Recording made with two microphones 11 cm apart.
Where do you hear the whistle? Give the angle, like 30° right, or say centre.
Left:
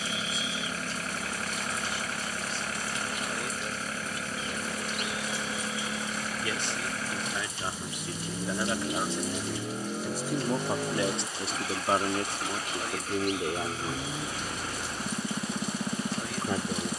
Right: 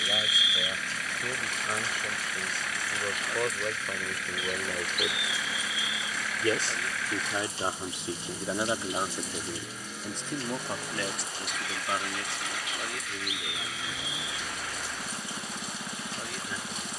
10° right.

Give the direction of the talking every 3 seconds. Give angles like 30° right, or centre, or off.
60° right, 50° right, 30° right, 10° left, 50° left, 60° left.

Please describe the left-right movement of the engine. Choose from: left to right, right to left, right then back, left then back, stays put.
stays put.